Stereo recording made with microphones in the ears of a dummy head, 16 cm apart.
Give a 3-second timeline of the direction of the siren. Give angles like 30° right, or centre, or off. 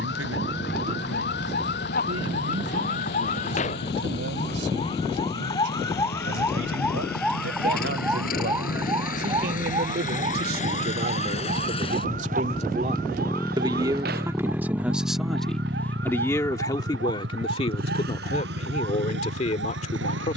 50° left, 30° left, centre, 30° right, 50° right, 60° right, 70° right.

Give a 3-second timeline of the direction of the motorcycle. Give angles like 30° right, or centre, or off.
60° left, 60° left, 50° left, 40° left, 10° left, 40° right, 60° right.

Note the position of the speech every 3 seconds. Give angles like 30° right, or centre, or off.
80° right, 70° right, 70° right, 50° right, 30° right, 20° left, 40° left.